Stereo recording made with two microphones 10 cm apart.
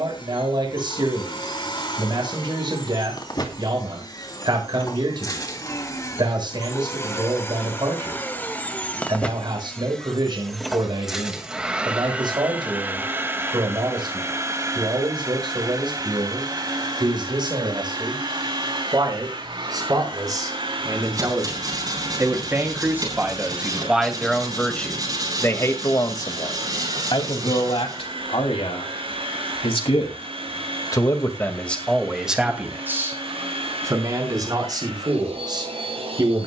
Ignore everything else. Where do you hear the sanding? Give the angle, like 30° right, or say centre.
40° right.